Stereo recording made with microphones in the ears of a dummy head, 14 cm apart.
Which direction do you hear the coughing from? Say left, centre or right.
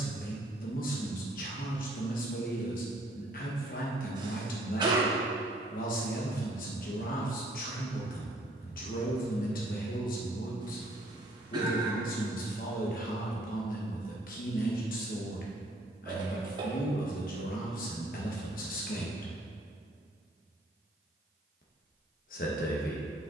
right.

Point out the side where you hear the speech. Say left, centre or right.
left.